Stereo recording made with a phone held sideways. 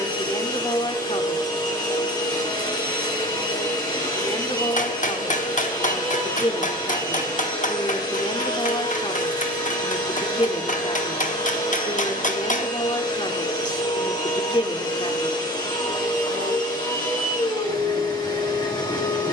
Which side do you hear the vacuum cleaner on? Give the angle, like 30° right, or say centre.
30° left.